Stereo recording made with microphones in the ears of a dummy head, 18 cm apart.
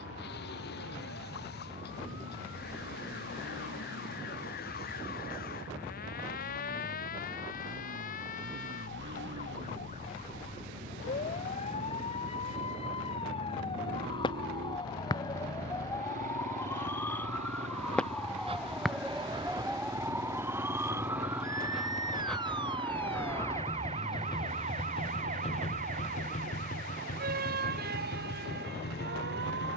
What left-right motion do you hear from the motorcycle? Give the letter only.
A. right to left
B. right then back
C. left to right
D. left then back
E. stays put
A.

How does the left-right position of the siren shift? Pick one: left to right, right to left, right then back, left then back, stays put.
left to right.